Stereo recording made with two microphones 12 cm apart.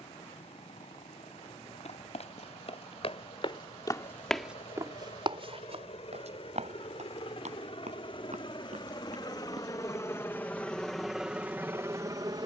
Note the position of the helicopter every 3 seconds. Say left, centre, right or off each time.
left, left, left, centre.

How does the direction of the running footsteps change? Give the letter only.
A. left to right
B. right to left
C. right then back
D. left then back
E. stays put
A.